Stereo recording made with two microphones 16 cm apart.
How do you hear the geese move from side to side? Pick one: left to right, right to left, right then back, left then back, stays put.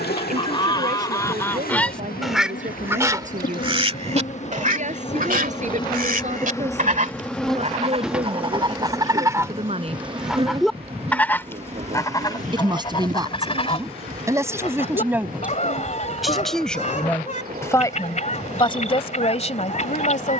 right then back.